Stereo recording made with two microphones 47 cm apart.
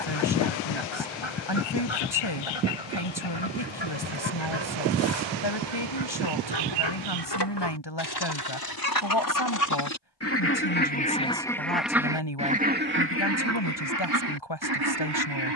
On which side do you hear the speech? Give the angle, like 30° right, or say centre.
60° left.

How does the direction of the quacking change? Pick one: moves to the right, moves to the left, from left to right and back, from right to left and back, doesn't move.
moves to the right.